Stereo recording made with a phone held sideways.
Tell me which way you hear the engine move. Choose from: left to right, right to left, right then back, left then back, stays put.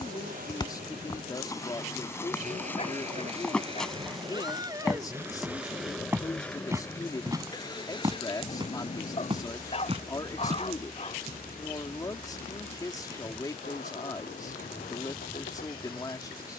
right to left.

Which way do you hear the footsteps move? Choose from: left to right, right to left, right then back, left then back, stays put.
left to right.